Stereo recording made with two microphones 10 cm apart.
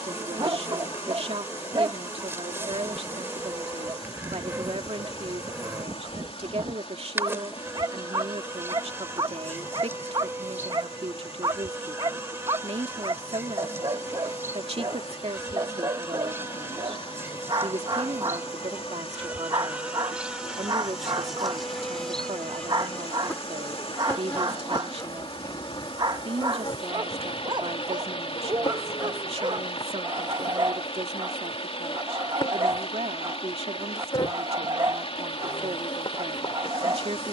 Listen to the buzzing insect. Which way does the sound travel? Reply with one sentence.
In this clip you hear the buzzing insect move from right to left.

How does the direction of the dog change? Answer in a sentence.
In this clip you hear the dog stay put.